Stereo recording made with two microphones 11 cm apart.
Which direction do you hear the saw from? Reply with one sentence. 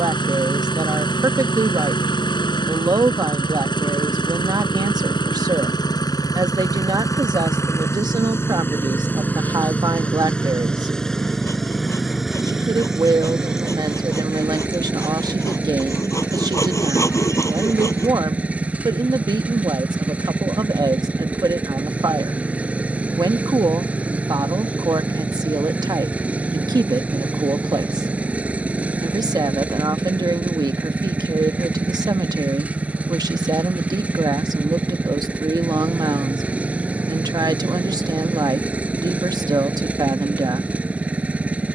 You can hear the saw on the left.